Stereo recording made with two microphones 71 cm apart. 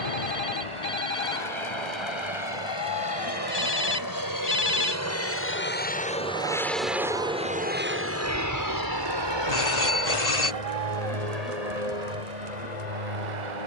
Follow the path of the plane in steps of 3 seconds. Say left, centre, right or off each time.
left, left, centre, right, right.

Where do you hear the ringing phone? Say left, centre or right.
left.